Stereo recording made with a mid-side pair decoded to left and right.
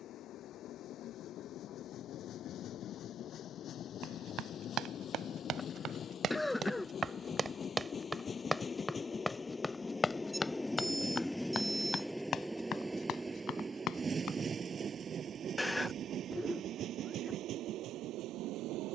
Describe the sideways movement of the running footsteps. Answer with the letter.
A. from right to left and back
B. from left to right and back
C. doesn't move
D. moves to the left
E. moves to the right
D.